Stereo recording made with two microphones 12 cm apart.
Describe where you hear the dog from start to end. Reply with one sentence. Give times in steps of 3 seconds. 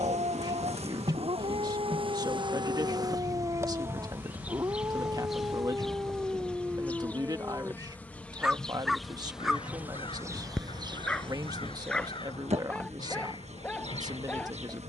You can hear the dog on the right from 0 s and in the centre from 6 s.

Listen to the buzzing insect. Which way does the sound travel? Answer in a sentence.
You can hear the buzzing insect move from right to left and back again.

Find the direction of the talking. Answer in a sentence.
You can hear the talking on the right.